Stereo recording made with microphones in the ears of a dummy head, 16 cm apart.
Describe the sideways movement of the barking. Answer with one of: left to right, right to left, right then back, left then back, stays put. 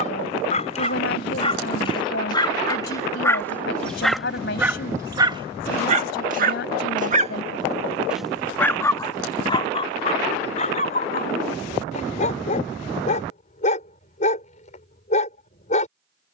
right then back.